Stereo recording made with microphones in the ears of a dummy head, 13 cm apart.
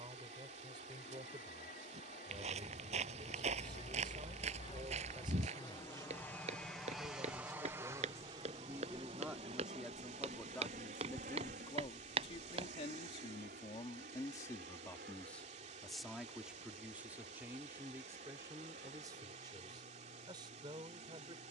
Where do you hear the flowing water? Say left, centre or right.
right.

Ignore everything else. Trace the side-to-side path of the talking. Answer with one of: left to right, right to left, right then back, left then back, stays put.
left then back.